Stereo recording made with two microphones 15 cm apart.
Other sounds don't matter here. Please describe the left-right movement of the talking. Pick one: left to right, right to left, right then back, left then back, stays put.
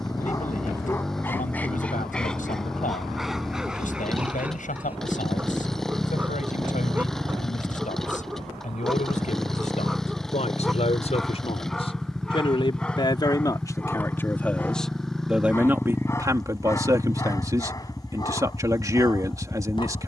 left to right.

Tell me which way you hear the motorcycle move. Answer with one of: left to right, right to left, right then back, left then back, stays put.
stays put.